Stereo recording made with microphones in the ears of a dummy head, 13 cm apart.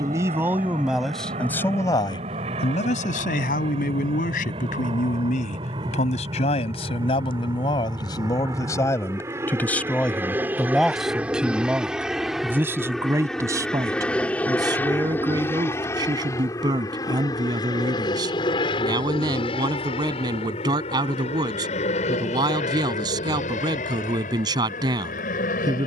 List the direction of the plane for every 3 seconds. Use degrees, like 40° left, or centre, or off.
50° right, 40° right, 30° right, 10° right, centre, 20° left, 40° left, 50° left, 50° left.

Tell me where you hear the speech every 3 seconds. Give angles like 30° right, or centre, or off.
10° left, 60° left, 30° left, centre, 20° right, 30° right, 30° right, 30° right, 30° right.